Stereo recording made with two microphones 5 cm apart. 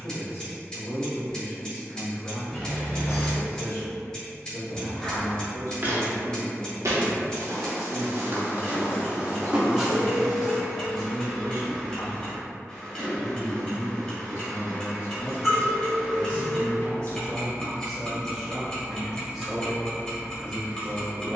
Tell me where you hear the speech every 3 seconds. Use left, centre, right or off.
left, left, left, left, left, left, centre.